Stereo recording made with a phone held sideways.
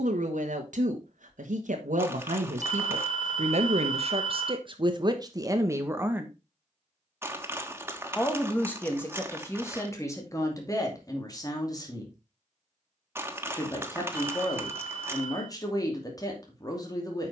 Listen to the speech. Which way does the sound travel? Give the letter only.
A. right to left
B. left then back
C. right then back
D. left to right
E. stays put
A.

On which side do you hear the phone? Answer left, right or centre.
left.